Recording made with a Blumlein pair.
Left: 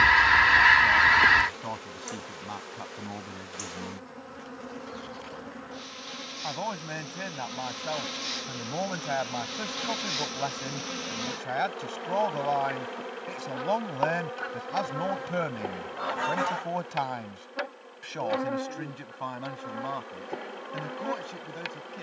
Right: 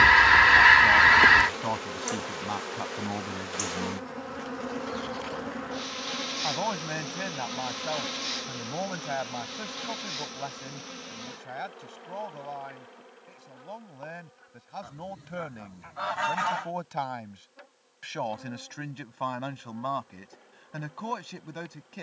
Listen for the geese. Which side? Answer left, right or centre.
centre.